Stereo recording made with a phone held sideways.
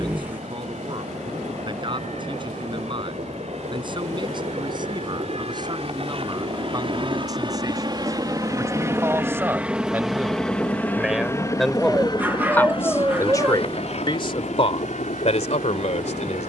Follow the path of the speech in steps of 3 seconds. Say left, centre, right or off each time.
right, right, right, centre, left, left.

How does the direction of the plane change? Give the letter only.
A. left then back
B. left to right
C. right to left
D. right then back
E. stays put
C.